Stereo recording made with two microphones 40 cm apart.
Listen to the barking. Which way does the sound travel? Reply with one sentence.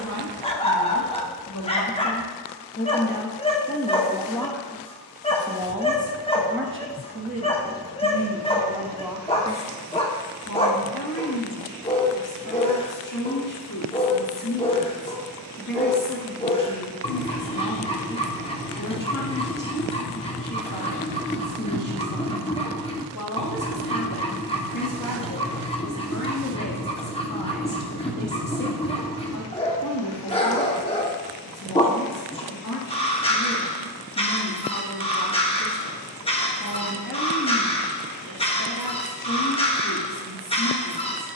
You can hear the barking stay in one place.